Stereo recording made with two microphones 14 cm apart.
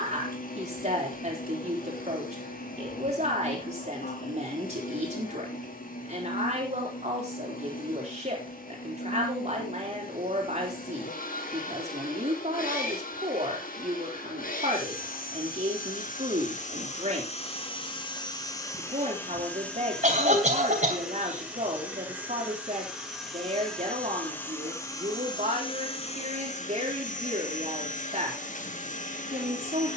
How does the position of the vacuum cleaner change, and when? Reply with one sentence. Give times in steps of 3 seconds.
You can hear the vacuum cleaner on the left from 0 s, in the centre from 18 s and on the left from 24 s.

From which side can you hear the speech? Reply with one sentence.
You can hear the speech on the right.